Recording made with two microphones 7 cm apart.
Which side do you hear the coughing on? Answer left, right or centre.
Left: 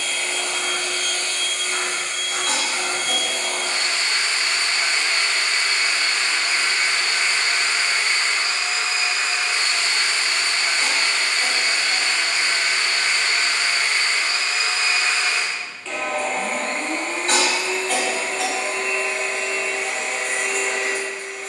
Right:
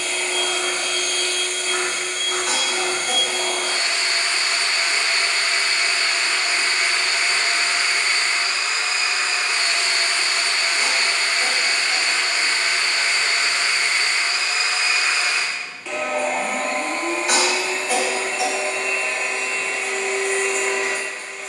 centre.